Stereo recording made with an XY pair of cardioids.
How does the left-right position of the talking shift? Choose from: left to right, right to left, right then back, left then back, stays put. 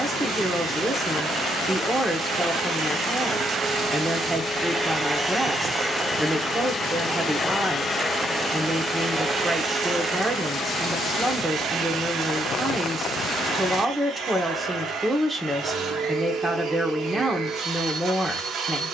stays put.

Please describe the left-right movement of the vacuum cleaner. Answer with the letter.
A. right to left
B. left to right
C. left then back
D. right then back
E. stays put
C.